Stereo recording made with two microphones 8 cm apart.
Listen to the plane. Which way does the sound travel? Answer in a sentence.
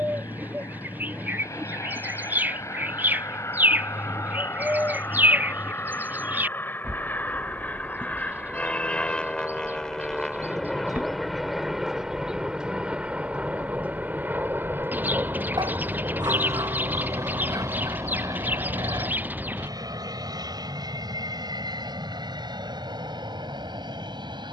In this clip you hear the plane move to the right.